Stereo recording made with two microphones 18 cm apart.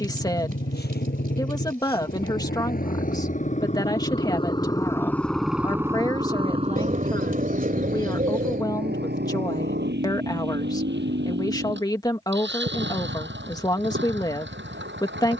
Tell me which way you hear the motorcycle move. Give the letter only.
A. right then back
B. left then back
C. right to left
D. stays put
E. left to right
E.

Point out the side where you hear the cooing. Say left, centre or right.
right.